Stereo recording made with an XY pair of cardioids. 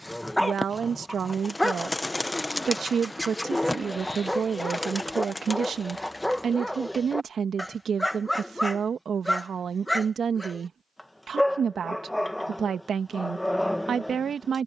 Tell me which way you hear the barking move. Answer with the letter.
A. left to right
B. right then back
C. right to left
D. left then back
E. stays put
E.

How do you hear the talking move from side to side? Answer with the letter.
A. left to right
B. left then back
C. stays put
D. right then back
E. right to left
C.